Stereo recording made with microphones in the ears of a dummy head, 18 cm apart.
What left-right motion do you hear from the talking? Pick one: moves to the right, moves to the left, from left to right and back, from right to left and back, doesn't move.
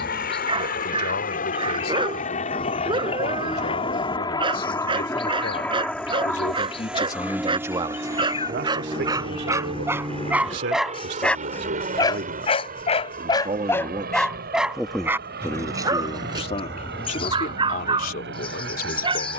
from left to right and back.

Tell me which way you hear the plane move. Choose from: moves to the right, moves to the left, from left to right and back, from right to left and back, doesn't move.
moves to the right.